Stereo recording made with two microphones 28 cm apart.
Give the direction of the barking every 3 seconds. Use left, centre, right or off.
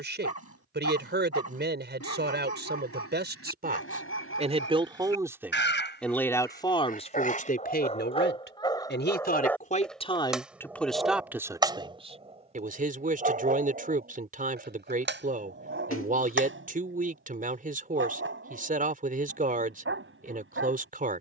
left, left, left, centre, right, right, right.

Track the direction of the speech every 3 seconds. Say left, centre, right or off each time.
right, right, left, centre, right, right, right.